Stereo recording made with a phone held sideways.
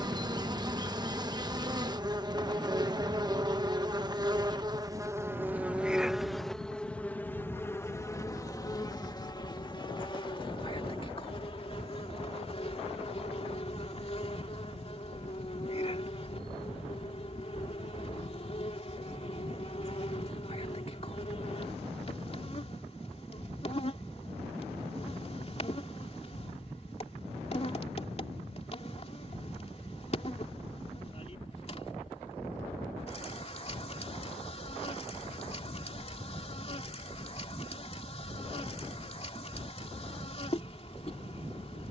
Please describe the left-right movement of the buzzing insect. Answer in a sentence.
In this clip you hear the buzzing insect move to the left.